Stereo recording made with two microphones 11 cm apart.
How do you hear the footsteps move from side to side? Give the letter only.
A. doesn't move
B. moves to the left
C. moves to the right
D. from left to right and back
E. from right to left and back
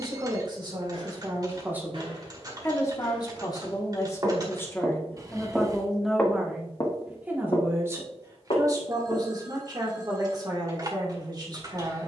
B.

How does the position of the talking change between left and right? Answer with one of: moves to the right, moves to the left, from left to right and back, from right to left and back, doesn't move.
from right to left and back.